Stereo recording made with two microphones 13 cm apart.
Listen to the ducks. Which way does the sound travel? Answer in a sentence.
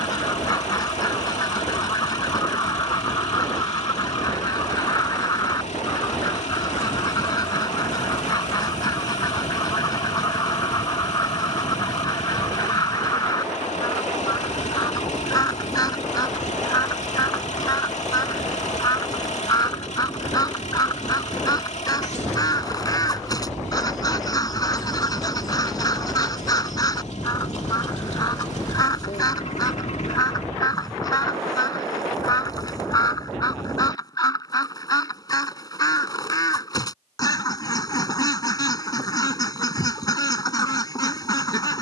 You can hear the ducks stay put.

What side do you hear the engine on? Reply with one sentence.
You can hear the engine on the left.